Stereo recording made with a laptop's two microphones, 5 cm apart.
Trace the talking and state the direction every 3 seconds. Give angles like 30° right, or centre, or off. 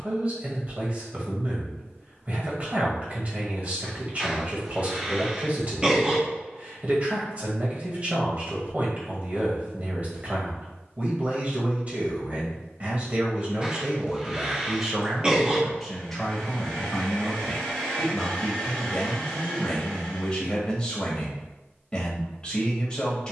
30° right, 30° right, 30° right, 30° right, 20° right, 10° left, 20° left, 20° left.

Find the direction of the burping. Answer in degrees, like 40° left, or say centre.
20° right.